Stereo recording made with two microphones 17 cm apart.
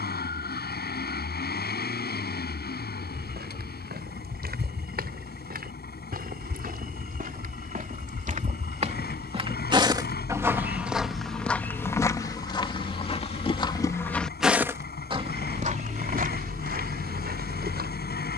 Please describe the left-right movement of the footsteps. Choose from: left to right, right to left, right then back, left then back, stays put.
left then back.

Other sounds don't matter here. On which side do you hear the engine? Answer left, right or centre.
left.